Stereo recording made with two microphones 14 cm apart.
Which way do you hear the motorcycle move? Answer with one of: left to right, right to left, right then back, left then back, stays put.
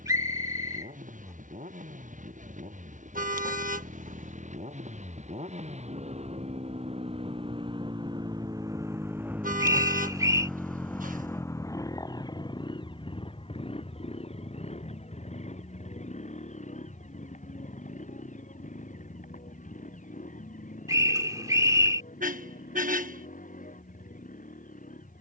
right to left.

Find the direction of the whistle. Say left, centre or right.
right.